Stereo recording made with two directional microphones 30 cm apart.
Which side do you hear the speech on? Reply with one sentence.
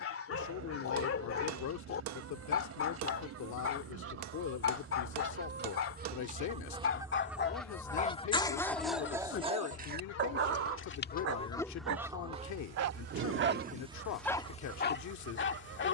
You can hear the speech on the left.